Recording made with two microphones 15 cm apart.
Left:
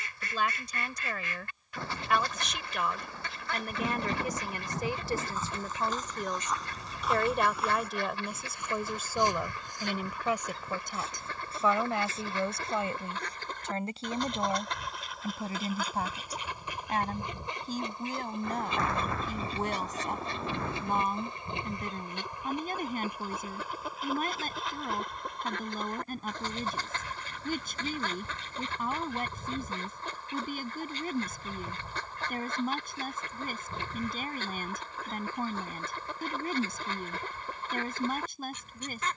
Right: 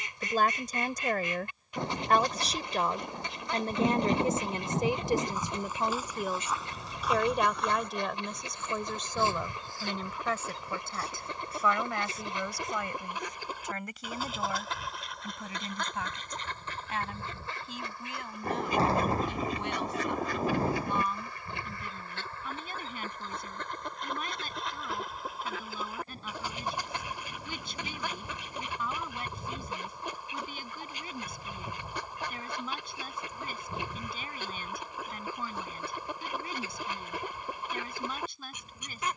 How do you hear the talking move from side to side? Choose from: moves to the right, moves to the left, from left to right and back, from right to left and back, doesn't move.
moves to the left.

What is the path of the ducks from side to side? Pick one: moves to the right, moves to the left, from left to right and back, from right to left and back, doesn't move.
from right to left and back.